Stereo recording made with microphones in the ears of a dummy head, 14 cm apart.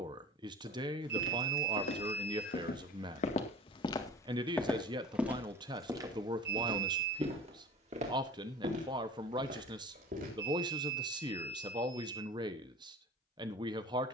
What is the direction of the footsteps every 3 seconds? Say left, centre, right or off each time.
left, centre, right, right, off.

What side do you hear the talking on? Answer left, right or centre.
right.